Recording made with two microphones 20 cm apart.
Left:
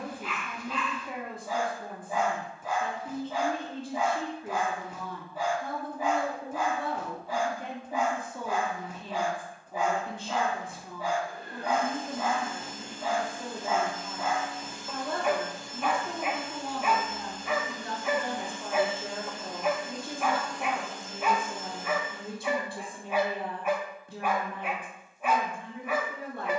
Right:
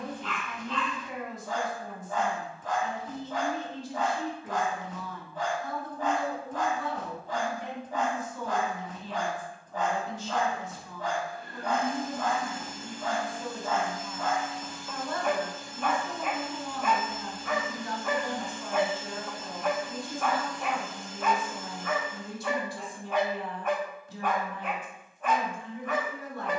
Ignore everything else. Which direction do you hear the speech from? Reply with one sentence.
You can hear the speech on the left.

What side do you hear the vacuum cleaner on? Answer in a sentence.
You can hear the vacuum cleaner on the left.